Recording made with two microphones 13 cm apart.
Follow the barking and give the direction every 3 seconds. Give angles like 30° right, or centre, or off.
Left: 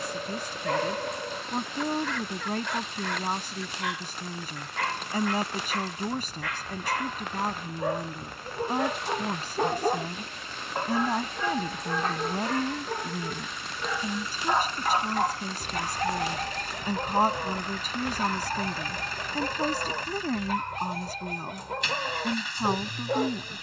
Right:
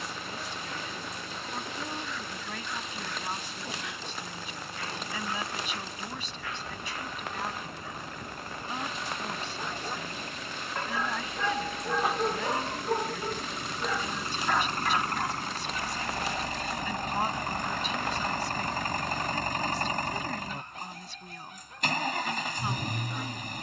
80° left, 80° left, 80° left, 30° left, centre, 70° left, 80° left, 80° left.